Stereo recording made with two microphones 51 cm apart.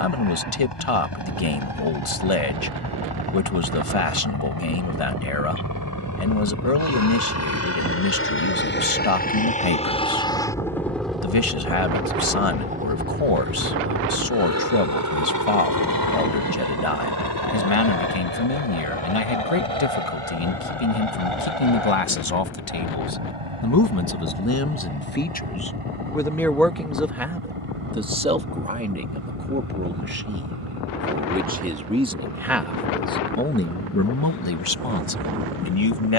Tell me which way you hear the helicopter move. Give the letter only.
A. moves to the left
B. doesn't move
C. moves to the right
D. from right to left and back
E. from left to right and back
C.